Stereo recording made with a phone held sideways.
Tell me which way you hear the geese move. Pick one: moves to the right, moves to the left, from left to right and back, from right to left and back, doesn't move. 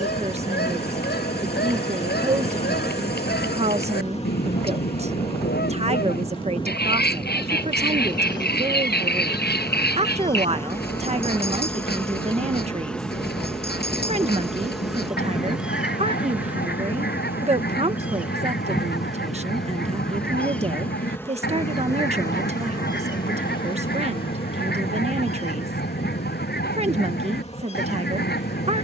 doesn't move.